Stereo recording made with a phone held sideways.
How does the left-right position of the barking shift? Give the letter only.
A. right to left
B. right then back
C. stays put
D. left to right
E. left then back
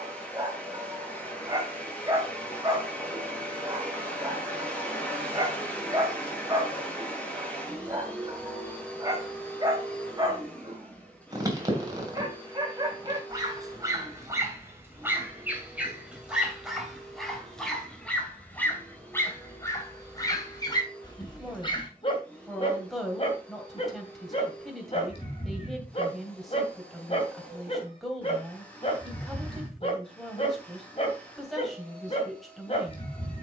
A.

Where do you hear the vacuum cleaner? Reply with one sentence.
In this clip you hear the vacuum cleaner in the centre.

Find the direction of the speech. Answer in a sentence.
You can hear the speech in the centre.